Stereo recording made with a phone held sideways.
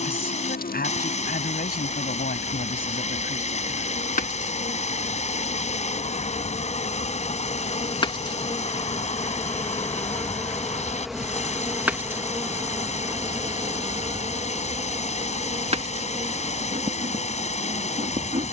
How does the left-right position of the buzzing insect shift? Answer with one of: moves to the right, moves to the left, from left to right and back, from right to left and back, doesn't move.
moves to the right.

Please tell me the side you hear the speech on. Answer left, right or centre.
left.